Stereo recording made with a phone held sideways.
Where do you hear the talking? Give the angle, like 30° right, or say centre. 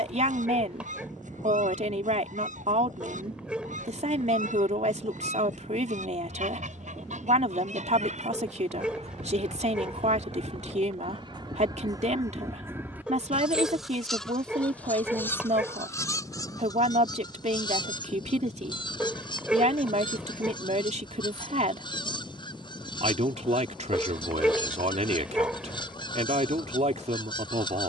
60° right.